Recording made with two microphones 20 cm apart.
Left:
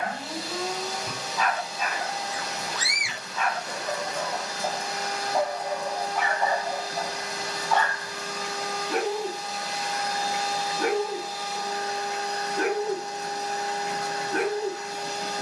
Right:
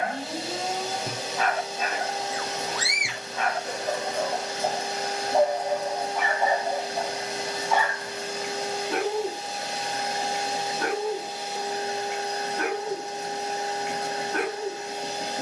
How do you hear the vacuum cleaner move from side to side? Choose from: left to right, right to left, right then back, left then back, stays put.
stays put.